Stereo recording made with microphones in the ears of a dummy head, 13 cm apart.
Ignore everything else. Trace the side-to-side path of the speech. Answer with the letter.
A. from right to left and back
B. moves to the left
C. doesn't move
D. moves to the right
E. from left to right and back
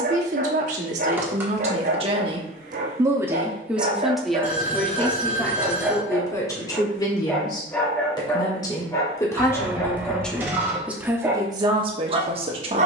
A.